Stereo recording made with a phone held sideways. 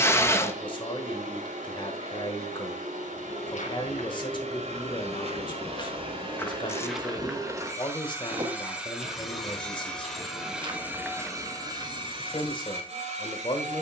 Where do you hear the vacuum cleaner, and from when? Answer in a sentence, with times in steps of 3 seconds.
You can hear the vacuum cleaner on the right from 0 s, in the centre from 9 s and on the right from 12 s.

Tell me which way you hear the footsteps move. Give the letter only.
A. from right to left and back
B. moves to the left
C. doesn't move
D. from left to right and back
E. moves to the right
D.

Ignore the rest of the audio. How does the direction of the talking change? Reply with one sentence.
In this clip you hear the talking stay put.